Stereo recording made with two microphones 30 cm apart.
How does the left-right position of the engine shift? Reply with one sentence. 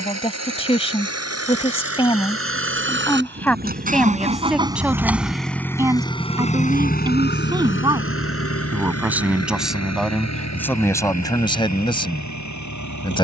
You can hear the engine travel towards the left.